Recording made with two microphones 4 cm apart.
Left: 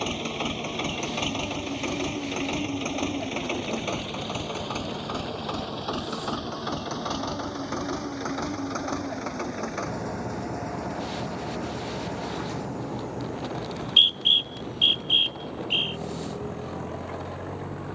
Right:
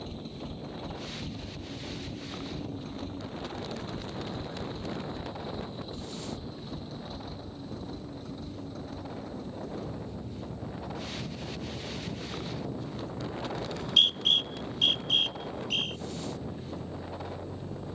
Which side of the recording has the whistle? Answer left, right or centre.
left.